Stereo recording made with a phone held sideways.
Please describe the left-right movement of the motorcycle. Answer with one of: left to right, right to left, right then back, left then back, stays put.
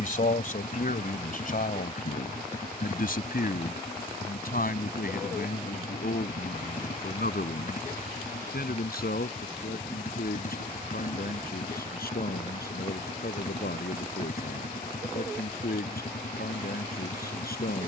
stays put.